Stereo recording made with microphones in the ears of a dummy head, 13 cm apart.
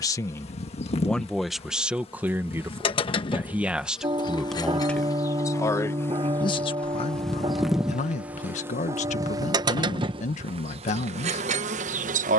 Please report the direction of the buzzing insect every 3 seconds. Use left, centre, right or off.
left, left, centre, right.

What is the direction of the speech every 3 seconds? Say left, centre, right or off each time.
centre, centre, left, left.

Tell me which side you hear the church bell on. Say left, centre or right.
right.